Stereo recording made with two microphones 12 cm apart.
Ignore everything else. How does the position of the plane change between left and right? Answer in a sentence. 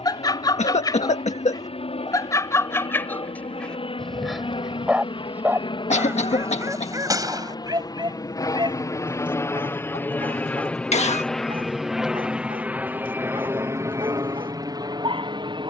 In this clip you hear the plane travel towards the right.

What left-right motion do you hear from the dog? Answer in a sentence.
You can hear the dog move to the right.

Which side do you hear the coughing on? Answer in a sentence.
You can hear the coughing on the left.